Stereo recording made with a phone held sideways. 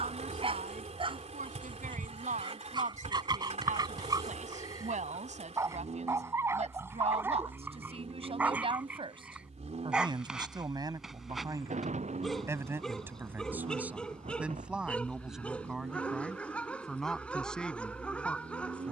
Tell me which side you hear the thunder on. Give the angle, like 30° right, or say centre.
60° right.